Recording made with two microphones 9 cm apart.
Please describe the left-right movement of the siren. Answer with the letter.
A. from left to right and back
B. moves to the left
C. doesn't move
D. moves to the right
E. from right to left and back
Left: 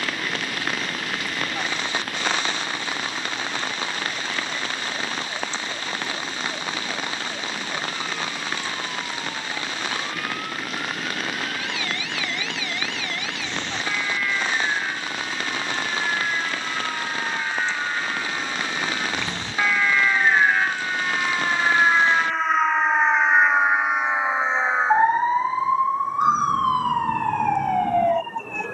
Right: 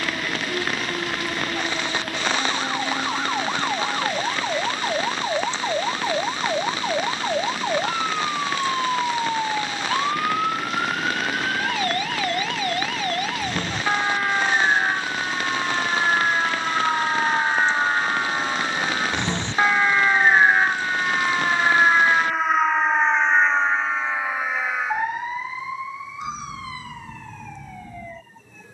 B.